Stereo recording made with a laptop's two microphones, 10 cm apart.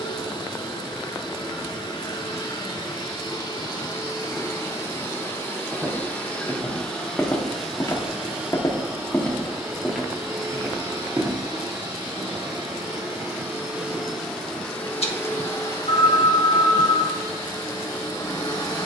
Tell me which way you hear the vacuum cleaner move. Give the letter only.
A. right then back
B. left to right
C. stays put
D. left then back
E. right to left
A.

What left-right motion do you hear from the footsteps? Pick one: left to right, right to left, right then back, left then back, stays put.
left then back.